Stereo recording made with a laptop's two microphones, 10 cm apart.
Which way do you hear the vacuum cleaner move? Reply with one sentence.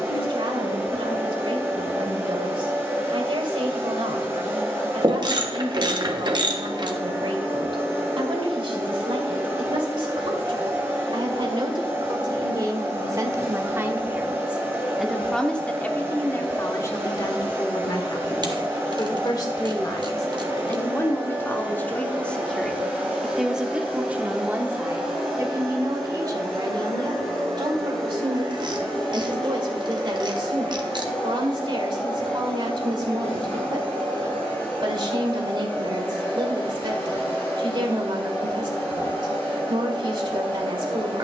In this clip you hear the vacuum cleaner go from the right side to the left.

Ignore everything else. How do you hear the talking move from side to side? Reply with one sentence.
You can hear the talking go left and come back.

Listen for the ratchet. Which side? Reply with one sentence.
You can hear the ratchet on the right.